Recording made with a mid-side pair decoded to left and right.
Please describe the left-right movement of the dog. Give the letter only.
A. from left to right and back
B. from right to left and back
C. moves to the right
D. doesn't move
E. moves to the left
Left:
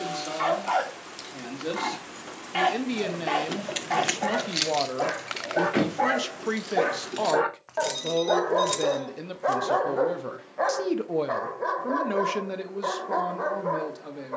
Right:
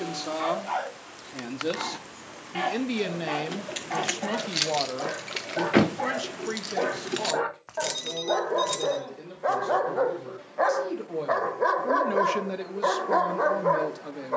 C.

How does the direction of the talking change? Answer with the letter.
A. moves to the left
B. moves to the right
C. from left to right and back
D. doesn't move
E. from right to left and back
E.